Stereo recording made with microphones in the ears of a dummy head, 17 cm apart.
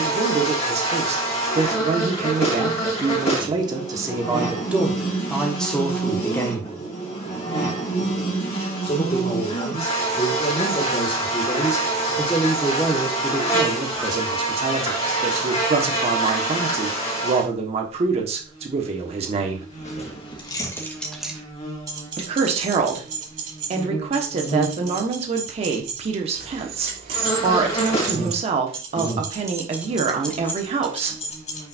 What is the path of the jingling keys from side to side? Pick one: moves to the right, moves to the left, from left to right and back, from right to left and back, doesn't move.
from left to right and back.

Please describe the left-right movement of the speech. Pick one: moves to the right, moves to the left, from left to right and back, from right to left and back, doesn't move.
from right to left and back.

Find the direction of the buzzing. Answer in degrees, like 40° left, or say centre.
30° left.